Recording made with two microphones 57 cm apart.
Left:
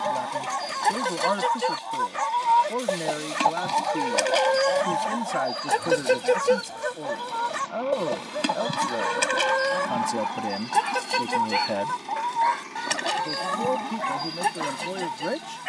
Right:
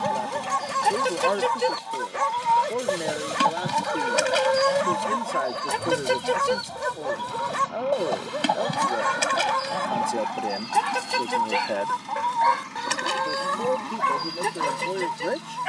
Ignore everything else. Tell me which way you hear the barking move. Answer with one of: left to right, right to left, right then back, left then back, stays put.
stays put.